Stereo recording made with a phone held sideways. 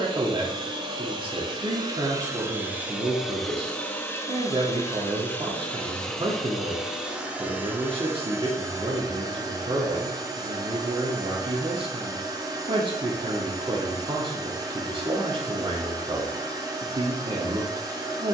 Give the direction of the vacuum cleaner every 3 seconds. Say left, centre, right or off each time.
right, centre, centre, right, right, right.